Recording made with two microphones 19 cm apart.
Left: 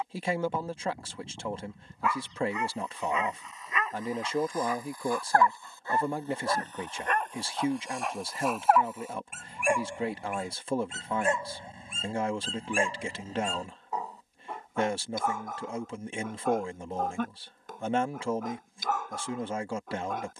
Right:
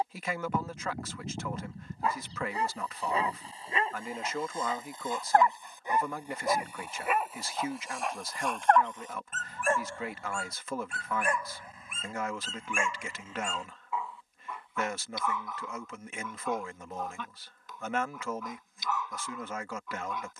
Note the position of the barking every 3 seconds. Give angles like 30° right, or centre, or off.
30° right, 30° right, centre, 20° left, 40° left, 50° left, 50° left.